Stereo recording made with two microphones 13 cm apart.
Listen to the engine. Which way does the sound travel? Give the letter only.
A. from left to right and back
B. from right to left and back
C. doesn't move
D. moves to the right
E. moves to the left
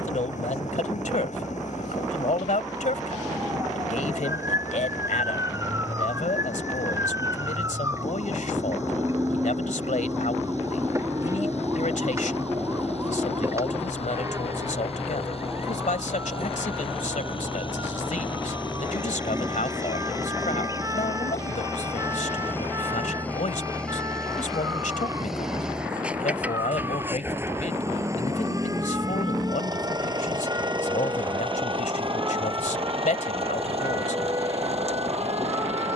D.